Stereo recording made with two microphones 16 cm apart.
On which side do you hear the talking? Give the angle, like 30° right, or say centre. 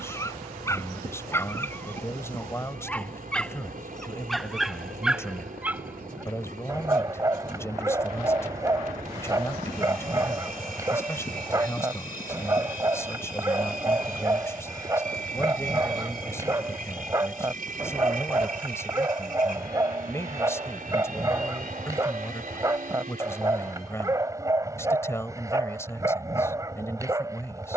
20° left.